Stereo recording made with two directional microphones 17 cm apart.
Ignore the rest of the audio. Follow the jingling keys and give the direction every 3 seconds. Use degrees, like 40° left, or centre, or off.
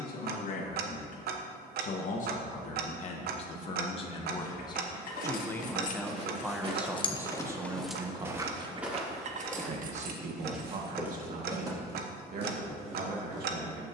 off, 60° left, 10° left, 50° right, off.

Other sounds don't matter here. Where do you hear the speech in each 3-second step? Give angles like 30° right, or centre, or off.
50° left, 30° left, 10° right, 50° right, 60° right.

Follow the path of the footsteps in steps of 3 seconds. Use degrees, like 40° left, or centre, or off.
off, 50° right, 20° right, 10° right, 40° right.